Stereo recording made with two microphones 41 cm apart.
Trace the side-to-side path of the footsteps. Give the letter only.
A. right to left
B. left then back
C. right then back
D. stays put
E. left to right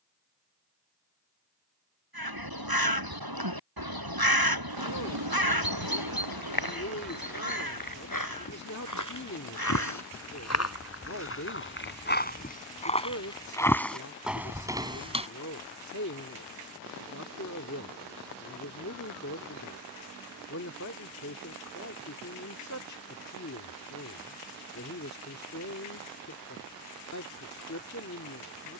E.